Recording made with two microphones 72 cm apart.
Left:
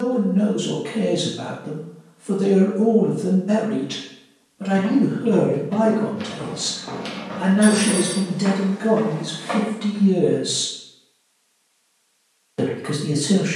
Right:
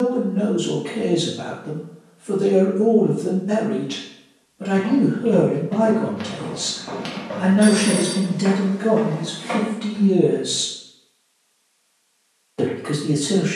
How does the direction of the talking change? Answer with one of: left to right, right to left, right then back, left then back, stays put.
right then back.